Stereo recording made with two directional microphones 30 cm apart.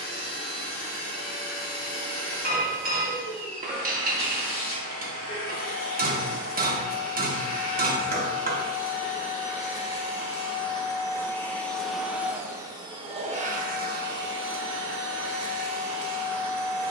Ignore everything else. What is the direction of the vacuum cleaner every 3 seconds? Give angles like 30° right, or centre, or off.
30° left, 30° left, 30° left, 20° left, 30° right, 60° right.